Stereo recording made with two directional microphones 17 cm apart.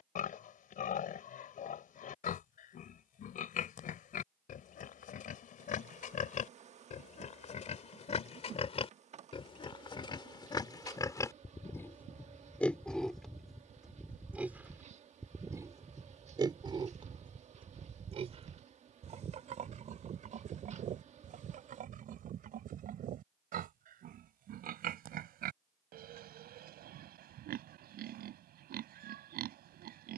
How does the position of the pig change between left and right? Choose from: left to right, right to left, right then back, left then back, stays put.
left to right.